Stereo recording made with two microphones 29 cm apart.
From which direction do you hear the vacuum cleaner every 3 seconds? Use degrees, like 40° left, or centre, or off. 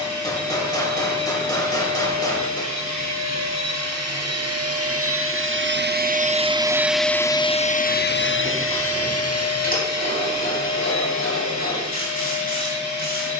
70° right, 60° right, 20° left, 70° left, 80° left.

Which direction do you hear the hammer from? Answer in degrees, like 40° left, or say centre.
10° left.